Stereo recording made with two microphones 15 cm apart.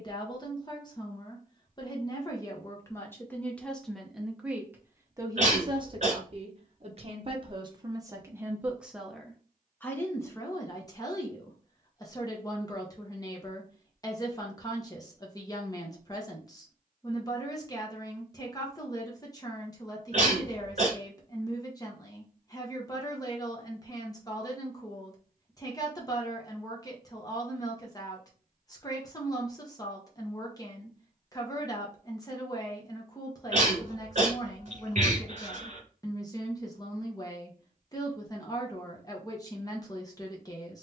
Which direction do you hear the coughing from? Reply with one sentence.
In this clip you hear the coughing on the right.